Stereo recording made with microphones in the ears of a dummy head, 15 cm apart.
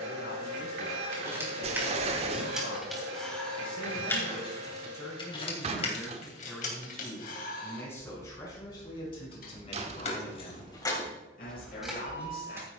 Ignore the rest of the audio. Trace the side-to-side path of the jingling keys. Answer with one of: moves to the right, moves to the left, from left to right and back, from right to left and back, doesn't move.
from right to left and back.